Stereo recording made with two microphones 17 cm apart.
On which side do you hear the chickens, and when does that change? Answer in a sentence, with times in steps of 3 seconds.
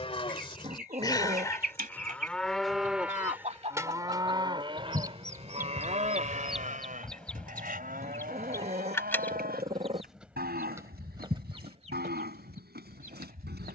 In this clip you hear the chickens on the right from 0 s, in the centre from 6 s and on the right from 12 s.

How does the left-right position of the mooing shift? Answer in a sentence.
You can hear the mooing travel towards the right.